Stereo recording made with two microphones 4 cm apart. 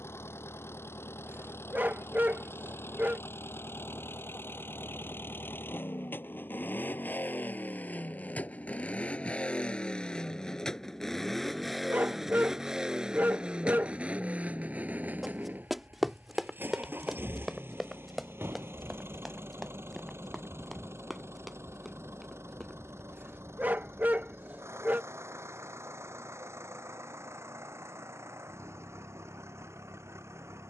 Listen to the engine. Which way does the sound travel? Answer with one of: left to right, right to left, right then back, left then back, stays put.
left to right.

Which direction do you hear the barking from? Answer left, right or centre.
right.